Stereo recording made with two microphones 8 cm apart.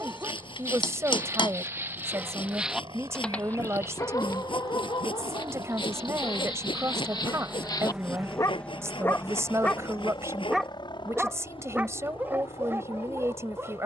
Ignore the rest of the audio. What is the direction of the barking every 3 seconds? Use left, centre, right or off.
right, left, left, centre, right.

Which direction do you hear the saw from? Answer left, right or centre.
left.